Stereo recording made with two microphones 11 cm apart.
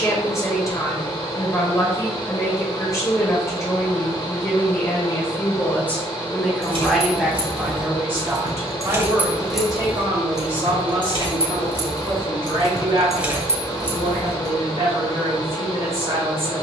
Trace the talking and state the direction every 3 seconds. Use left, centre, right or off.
left, left, centre, right, right, right.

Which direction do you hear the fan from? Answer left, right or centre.
left.